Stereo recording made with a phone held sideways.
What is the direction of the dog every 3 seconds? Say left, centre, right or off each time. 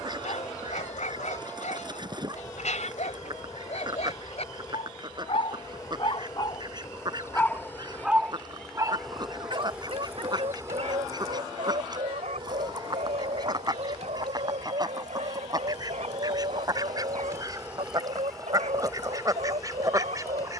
left, left, centre, right, right, right, right.